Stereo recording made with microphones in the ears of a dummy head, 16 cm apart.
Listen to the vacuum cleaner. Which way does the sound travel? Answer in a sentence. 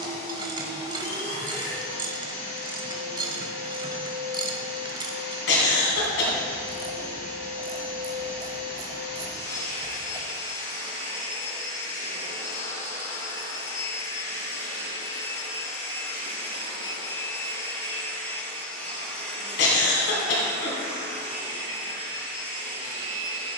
You can hear the vacuum cleaner move from left to right.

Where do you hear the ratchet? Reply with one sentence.
You can hear the ratchet on the right.